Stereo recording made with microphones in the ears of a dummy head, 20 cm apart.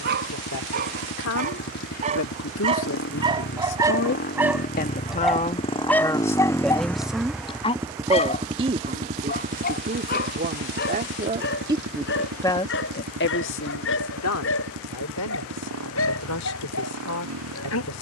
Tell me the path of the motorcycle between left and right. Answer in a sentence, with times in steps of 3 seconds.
In this clip you hear the motorcycle on the left from 0 s, in the centre from 6 s and on the right from 9 s.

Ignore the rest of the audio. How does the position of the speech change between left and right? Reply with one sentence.
In this clip you hear the speech go right and come back.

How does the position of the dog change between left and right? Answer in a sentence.
You can hear the dog move from right to left.